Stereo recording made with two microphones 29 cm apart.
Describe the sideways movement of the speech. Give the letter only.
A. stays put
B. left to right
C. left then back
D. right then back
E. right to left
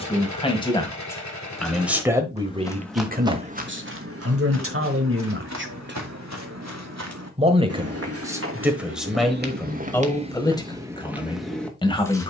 D.